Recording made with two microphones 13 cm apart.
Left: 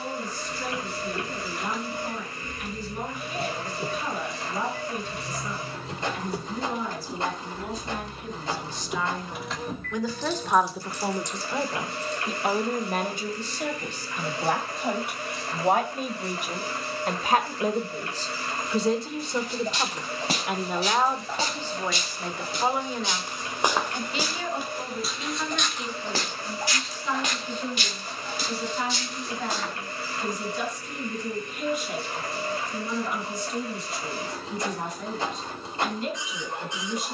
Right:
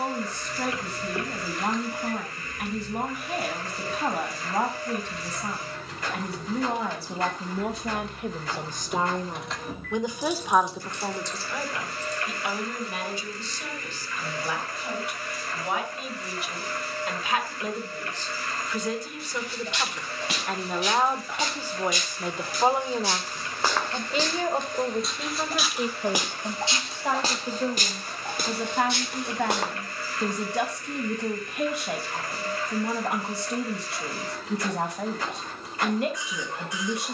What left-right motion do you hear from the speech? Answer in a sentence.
You can hear the speech move from right to left and back again.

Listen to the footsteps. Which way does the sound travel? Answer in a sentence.
In this clip you hear the footsteps move to the right.